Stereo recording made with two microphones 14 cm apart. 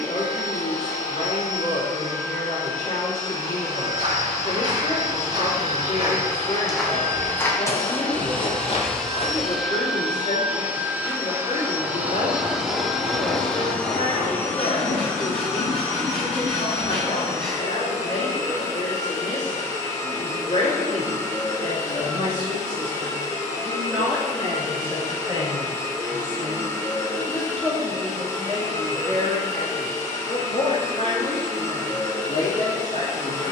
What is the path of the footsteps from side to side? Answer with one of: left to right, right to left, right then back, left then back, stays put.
right to left.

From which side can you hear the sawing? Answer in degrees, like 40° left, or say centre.
10° left.